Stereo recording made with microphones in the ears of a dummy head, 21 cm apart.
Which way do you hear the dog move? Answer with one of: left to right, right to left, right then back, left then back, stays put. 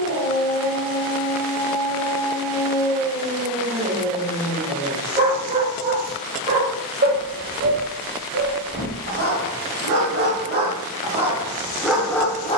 right then back.